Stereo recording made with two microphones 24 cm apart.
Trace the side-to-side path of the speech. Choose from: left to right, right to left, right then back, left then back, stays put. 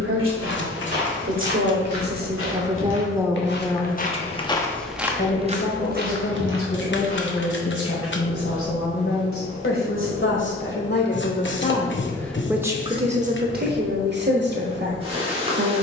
left then back.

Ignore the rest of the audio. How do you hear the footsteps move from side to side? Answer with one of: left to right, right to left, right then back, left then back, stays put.
left to right.